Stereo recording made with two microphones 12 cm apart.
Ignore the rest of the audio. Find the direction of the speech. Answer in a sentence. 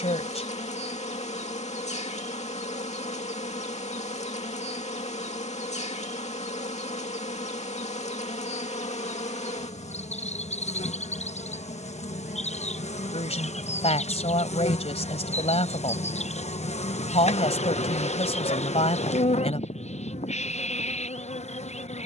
In this clip you hear the speech on the left.